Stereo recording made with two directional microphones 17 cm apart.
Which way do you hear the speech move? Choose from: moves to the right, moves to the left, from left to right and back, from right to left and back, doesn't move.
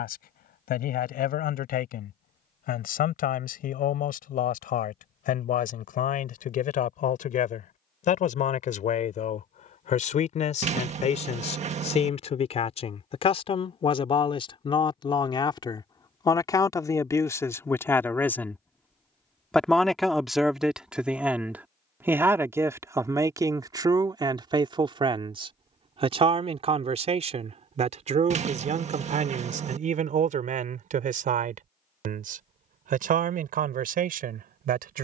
moves to the right.